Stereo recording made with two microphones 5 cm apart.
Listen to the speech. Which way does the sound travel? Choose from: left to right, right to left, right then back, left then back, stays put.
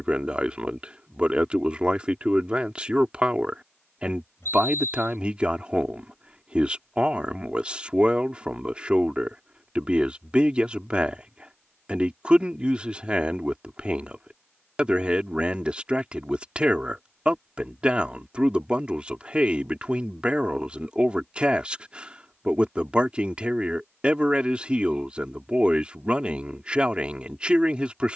stays put.